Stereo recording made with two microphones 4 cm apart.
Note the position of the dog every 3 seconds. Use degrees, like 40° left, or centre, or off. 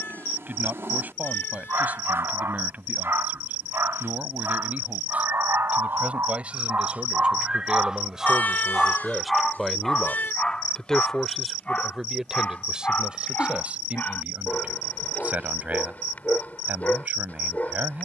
80° right, 70° right, 30° right, 20° left, 40° left, 40° left.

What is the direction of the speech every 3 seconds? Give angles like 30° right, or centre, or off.
40° right, 40° right, 20° right, centre, 30° right, 40° right.